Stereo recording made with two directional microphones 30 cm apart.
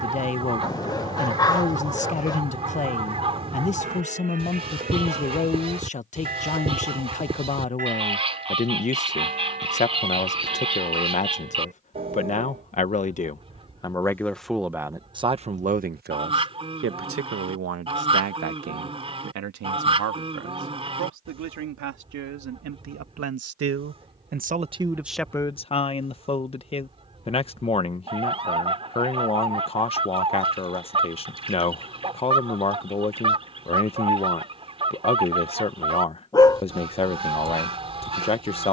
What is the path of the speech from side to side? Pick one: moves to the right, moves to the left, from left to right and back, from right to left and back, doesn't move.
from left to right and back.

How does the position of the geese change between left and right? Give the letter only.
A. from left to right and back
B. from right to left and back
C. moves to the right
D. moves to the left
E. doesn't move
E.